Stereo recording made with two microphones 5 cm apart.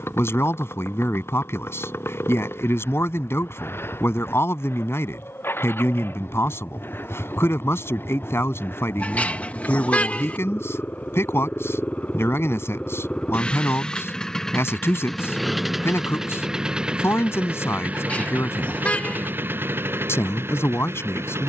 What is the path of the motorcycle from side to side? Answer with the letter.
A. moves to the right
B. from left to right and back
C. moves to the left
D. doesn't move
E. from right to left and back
A.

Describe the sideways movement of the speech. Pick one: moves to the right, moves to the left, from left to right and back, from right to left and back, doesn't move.
doesn't move.